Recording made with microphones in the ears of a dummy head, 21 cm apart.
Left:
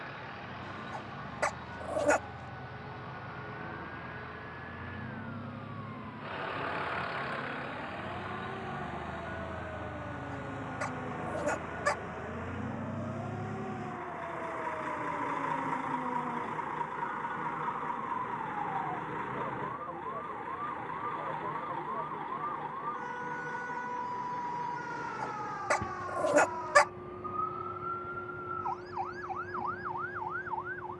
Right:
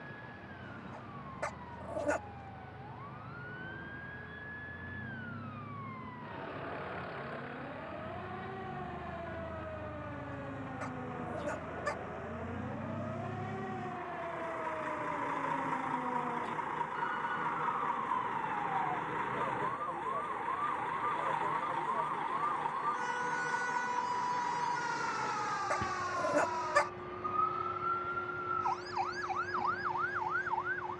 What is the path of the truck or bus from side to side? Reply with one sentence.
You can hear the truck or bus move from left to right.